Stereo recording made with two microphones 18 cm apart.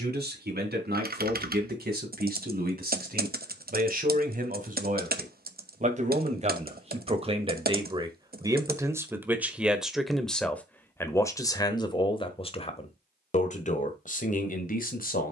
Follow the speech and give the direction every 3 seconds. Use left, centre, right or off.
right, right, right, centre, left.